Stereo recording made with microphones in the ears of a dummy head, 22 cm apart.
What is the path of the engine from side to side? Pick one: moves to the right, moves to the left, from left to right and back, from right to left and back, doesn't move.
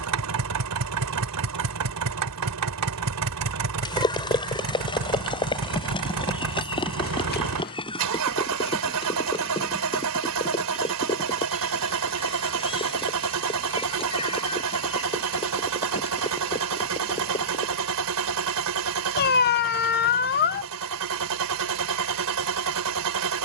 doesn't move.